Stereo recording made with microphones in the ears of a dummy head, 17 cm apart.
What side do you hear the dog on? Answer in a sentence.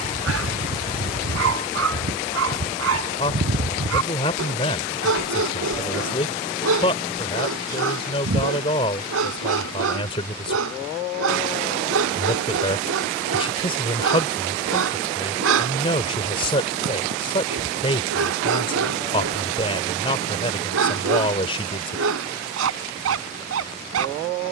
You can hear the dog on the right.